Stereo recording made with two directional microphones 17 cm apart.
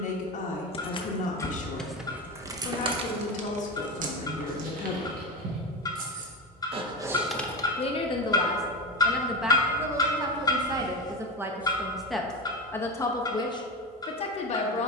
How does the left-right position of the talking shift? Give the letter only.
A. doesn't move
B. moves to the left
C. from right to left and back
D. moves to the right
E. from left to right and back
E.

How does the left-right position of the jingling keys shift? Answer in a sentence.
In this clip you hear the jingling keys move from left to right and back again.